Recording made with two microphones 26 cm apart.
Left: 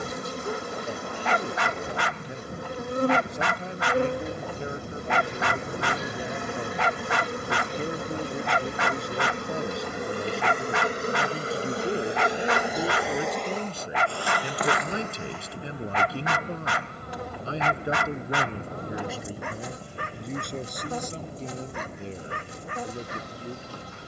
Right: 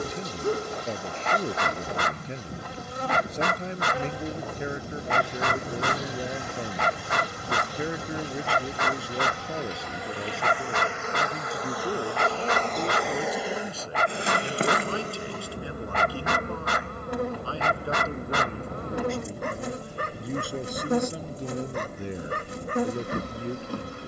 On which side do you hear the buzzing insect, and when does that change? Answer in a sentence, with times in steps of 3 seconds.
In this clip you hear the buzzing insect on the left from 0 s, in the centre from 12 s and on the right from 15 s.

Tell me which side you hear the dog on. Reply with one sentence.
In this clip you hear the dog on the right.